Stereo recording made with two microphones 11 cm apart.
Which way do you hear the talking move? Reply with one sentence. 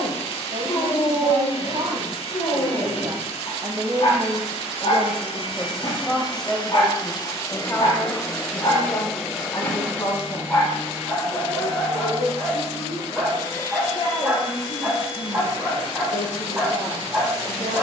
In this clip you hear the talking move from right to left.